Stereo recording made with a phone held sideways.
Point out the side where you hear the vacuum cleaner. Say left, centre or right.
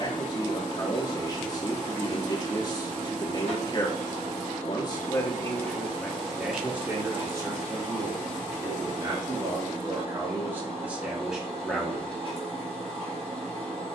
right.